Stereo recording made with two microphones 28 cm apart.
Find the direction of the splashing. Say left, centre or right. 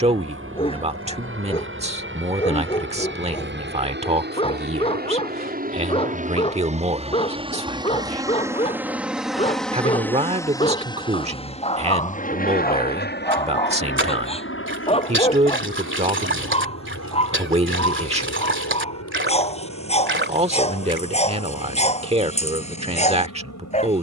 right.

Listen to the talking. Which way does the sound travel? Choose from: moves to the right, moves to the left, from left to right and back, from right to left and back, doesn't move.
doesn't move.